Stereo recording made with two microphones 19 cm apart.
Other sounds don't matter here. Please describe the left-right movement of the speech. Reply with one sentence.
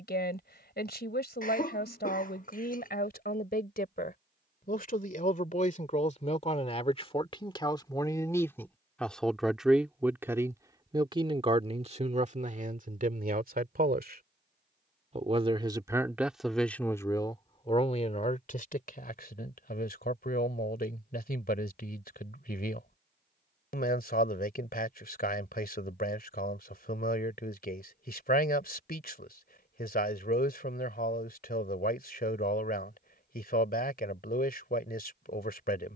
You can hear the speech move from left to right and back again.